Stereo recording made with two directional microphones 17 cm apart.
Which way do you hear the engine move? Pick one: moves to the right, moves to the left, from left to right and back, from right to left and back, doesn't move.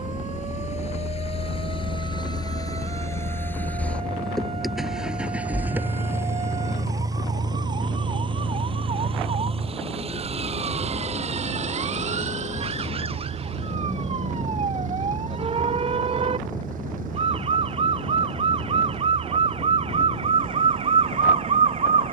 moves to the right.